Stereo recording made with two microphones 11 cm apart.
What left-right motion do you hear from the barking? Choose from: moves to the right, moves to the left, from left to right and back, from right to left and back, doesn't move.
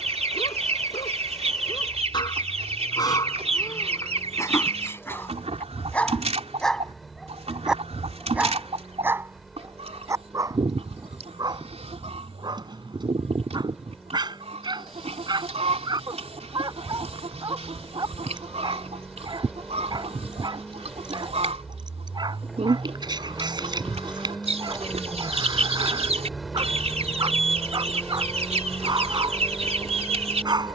moves to the right.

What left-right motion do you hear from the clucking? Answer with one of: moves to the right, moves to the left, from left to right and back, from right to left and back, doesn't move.
doesn't move.